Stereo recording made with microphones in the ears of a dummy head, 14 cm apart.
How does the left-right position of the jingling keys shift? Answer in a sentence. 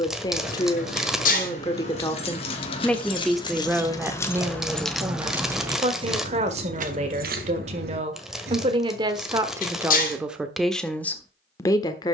You can hear the jingling keys move from left to right.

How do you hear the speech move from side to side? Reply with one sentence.
In this clip you hear the speech move from left to right and back again.